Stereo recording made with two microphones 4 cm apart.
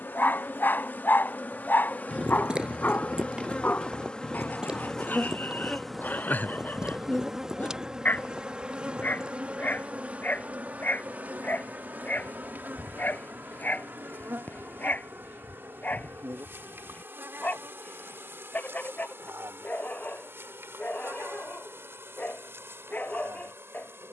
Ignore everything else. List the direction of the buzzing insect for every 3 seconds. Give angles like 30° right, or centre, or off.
40° left, 20° left, 10° right, 30° right, 50° right, 60° right, 60° right, 70° right.